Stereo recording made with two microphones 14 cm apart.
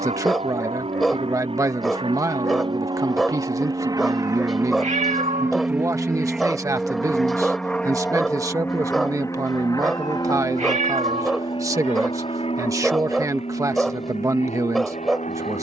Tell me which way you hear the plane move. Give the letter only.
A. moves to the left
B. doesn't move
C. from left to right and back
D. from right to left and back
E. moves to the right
A.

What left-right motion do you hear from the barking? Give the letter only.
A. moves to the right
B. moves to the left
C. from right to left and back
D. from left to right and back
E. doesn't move
E.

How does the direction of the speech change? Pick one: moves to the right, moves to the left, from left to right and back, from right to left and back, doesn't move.
doesn't move.